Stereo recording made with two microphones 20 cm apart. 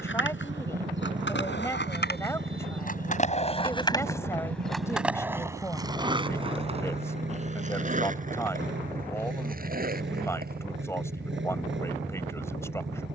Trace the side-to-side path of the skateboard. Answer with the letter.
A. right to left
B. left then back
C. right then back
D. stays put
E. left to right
E.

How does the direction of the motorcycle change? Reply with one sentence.
In this clip you hear the motorcycle stay in one place.